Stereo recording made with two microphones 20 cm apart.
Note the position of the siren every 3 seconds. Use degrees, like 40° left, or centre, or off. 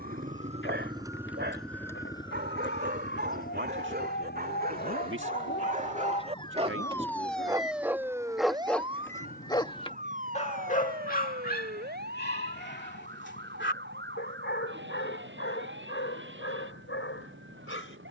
70° left, 50° left, centre, 40° right, 60° right, 60° right.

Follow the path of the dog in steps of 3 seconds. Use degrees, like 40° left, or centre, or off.
60° right, 50° right, 10° right, 30° left, 60° left, 70° left.